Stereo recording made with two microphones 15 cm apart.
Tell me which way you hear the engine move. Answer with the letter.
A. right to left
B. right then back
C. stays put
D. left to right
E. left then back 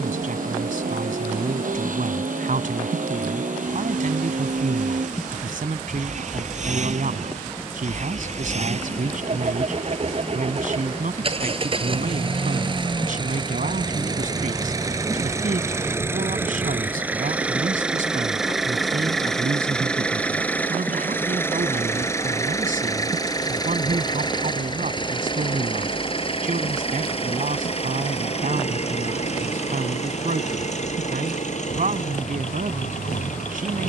A.